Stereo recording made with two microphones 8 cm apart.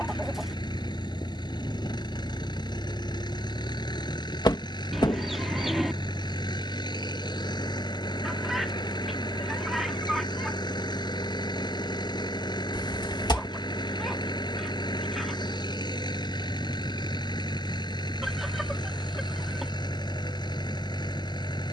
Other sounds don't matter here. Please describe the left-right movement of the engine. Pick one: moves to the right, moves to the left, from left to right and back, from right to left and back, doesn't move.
doesn't move.